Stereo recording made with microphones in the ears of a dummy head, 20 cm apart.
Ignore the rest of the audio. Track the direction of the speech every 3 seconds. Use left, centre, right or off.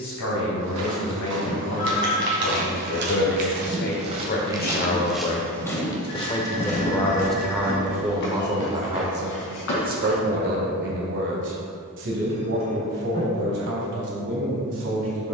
left, left, centre, right, right.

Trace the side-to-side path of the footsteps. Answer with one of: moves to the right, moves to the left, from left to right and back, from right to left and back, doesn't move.
moves to the left.